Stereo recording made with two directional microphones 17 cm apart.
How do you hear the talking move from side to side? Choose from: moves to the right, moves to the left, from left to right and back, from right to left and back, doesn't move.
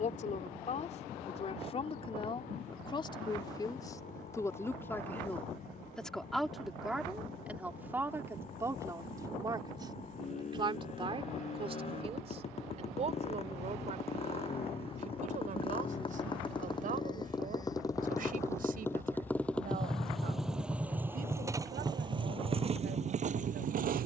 moves to the right.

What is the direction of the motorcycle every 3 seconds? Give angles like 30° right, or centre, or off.
50° left, 50° left, 50° left, 40° left, 40° left, 30° left, 10° left, 30° right.